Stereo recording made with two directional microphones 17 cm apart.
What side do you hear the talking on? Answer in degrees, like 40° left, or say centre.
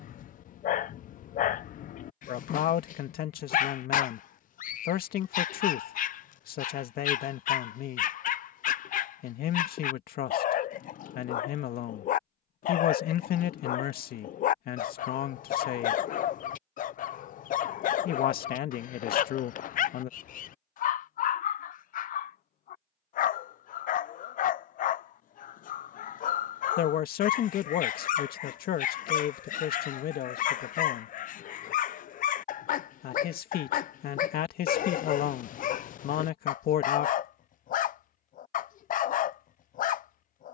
60° left.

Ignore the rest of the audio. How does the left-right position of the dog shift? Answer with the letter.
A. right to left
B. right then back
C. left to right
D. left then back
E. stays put
E.